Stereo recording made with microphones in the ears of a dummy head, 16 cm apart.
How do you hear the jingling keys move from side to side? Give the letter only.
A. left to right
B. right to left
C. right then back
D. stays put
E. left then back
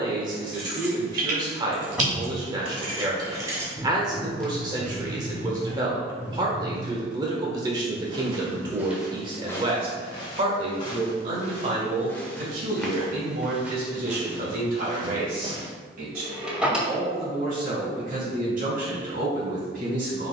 B.